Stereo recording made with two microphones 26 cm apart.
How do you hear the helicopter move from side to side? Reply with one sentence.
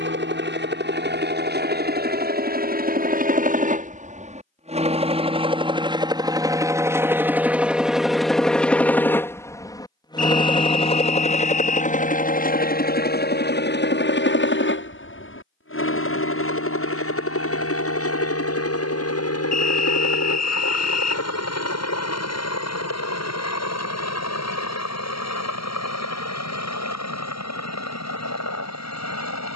In this clip you hear the helicopter move from right to left.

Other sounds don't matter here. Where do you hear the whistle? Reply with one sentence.
In this clip you hear the whistle on the left.